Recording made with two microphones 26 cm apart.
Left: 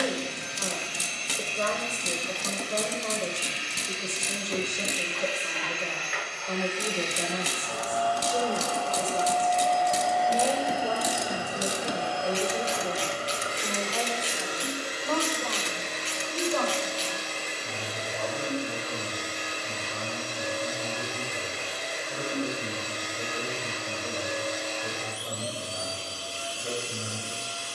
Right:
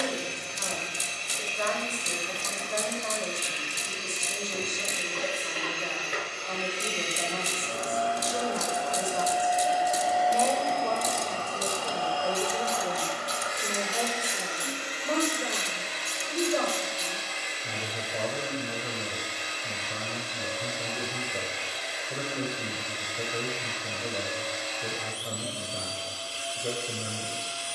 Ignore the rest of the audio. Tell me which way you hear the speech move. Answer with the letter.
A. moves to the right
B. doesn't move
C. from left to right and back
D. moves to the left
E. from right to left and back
A.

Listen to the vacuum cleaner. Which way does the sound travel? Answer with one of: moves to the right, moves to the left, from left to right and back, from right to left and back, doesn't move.
moves to the left.